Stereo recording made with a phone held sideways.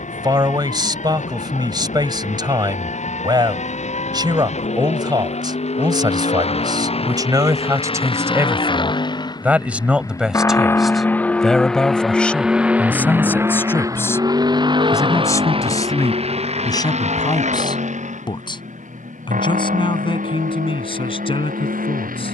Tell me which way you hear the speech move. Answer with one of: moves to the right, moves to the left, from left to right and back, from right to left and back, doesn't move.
moves to the left.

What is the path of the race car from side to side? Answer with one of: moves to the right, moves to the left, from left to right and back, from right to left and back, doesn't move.
moves to the right.